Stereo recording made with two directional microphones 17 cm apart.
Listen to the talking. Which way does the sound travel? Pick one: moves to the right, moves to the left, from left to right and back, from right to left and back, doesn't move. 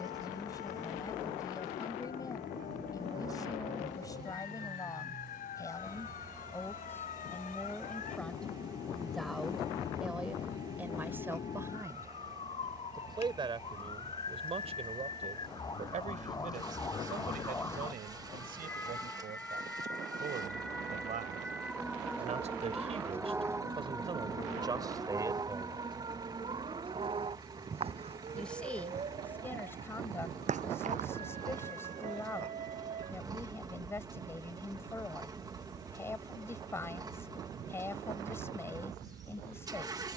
from left to right and back.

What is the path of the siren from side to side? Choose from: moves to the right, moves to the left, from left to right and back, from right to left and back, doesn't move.
moves to the right.